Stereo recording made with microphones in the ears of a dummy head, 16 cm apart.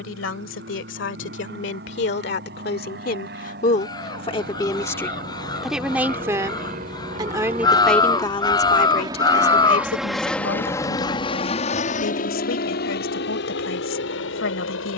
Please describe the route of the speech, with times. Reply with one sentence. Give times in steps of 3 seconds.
You can hear the speech on the left from 0 s, in the centre from 6 s and on the left from 9 s.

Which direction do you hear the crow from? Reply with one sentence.
In this clip you hear the crow on the left.